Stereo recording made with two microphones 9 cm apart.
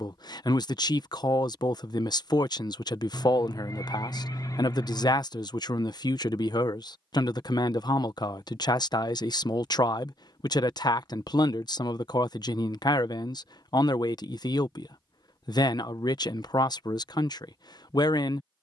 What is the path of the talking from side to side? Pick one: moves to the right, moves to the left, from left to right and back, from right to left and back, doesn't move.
doesn't move.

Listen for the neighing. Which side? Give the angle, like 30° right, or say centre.
40° left.